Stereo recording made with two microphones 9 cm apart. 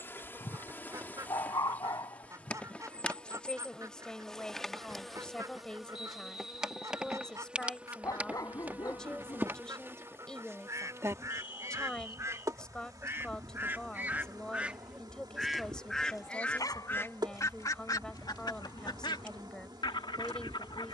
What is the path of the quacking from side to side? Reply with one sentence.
You can hear the quacking move to the left.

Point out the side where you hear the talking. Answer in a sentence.
You can hear the talking in the centre.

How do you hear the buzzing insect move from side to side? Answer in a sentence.
In this clip you hear the buzzing insect travel towards the right.